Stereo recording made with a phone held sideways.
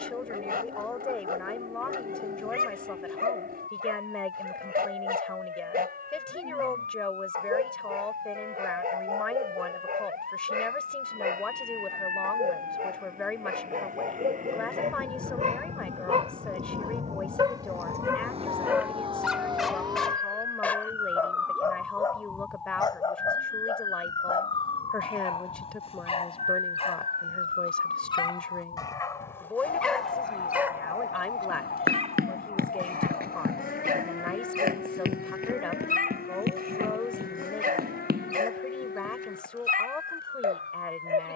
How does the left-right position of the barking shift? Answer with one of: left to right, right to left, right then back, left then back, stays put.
left then back.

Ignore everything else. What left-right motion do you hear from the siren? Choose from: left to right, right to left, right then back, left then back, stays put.
right to left.